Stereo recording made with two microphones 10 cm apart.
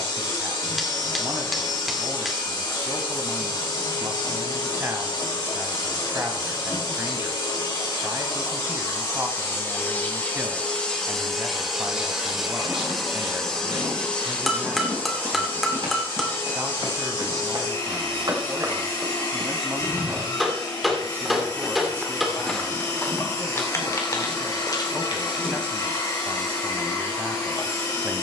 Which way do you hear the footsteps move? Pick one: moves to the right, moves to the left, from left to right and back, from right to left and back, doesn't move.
moves to the left.